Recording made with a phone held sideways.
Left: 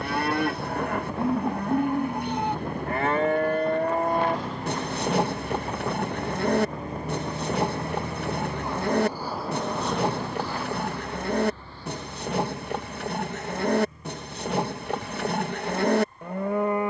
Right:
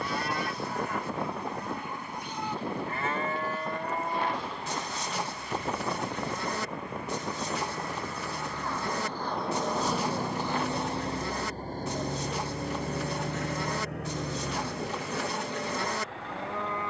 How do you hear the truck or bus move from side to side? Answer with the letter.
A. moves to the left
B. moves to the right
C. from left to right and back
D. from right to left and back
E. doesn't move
B.